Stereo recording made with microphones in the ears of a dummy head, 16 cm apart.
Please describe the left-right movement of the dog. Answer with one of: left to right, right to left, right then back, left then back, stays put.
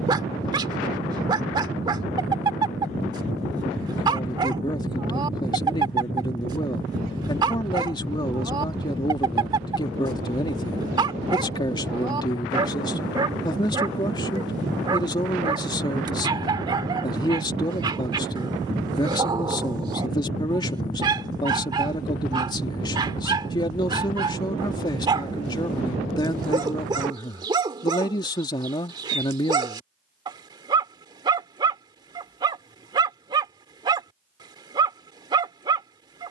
stays put.